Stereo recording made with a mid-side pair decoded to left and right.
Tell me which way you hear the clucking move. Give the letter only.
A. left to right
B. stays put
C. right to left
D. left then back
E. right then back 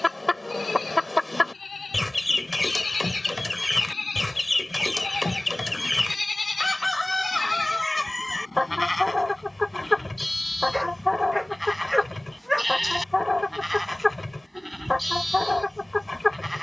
B.